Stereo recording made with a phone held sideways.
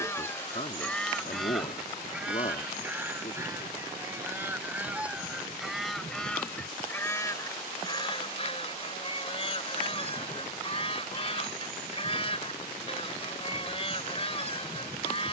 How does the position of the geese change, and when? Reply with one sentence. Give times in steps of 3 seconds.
In this clip you hear the geese in the centre from 0 s and on the left from 6 s.